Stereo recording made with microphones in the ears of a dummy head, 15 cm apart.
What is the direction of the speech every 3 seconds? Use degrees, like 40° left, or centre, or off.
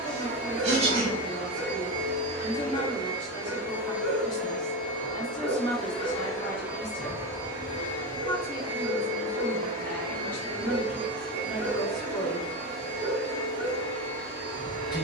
30° left, 30° left, 30° left, 10° left, 10° left.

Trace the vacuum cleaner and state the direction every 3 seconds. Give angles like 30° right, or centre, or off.
60° right, centre, 20° right, 60° right, 70° right.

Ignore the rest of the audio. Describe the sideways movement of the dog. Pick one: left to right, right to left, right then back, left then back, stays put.
stays put.